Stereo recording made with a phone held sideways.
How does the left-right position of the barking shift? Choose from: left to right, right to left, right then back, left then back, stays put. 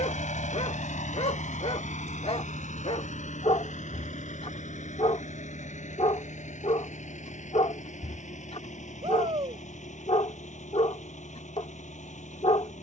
stays put.